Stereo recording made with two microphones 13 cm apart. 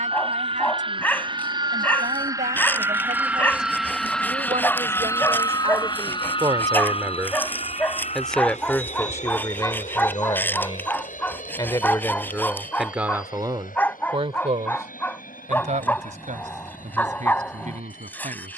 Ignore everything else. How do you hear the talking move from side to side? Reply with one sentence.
In this clip you hear the talking move from right to left and back again.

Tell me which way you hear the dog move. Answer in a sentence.
You can hear the dog stay put.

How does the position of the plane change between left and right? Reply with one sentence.
You can hear the plane move from right to left.